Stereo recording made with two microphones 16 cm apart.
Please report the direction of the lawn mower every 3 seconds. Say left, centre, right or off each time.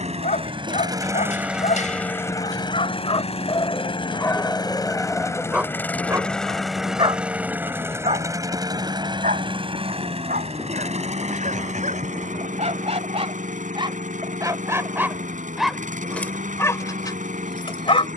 centre, left, centre, right, right, right.